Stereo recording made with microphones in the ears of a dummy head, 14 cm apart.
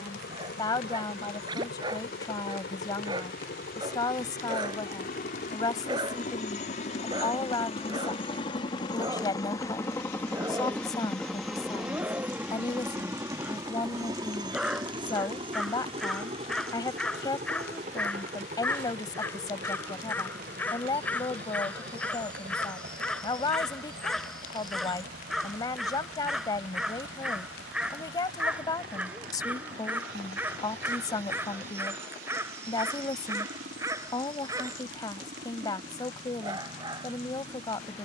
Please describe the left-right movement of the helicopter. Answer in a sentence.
You can hear the helicopter go from the left side to the right.